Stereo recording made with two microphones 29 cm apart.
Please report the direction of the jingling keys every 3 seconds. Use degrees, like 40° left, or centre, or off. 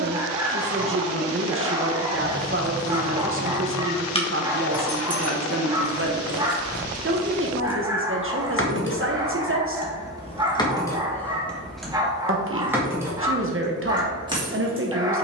20° right, 30° left, 60° left, 20° left, 10° right.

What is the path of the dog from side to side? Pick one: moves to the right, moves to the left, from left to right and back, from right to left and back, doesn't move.
doesn't move.